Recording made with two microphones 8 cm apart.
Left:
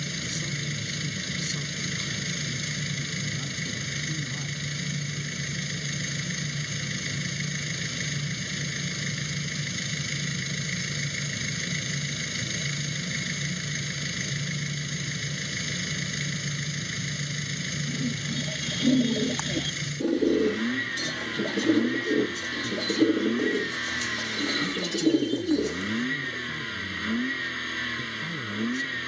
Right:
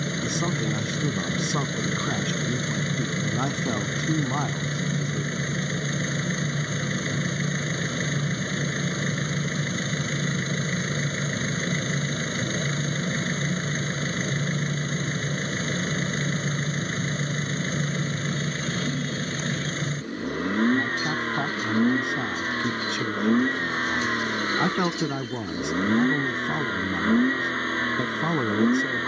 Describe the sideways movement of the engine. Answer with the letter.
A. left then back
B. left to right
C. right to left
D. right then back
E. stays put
E.